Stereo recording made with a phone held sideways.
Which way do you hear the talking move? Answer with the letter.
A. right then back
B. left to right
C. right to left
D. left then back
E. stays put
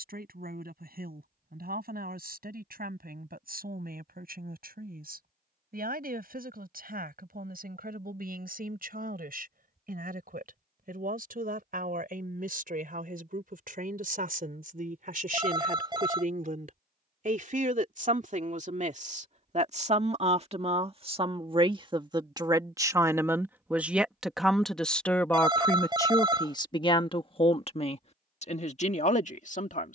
C.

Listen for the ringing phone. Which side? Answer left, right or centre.
right.